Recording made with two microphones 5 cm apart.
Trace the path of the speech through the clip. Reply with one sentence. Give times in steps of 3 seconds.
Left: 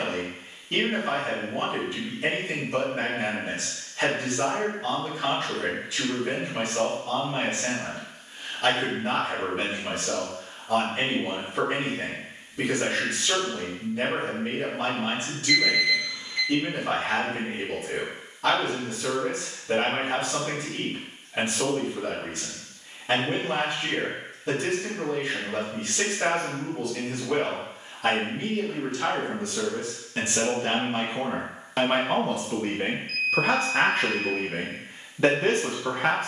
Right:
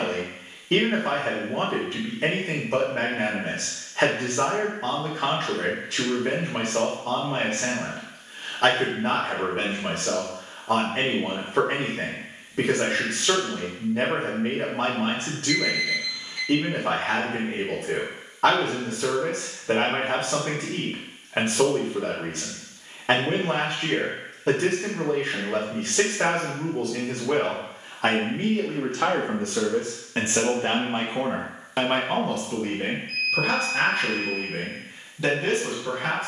You can hear the speech on the right from 0 s, in the centre from 30 s and on the left from 33 s.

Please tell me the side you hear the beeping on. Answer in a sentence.
You can hear the beeping on the left.